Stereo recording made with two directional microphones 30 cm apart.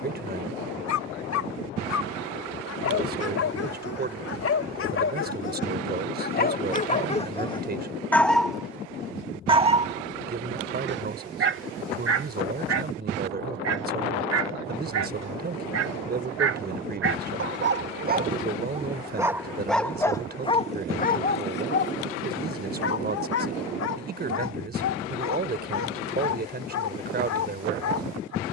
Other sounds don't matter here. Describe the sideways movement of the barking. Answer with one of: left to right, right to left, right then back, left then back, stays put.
right then back.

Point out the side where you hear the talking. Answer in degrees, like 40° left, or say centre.
30° right.